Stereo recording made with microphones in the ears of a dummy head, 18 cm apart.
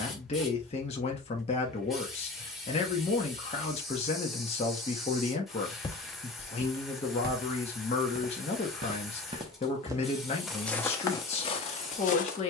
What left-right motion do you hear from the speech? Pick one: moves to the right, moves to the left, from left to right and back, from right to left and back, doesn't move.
doesn't move.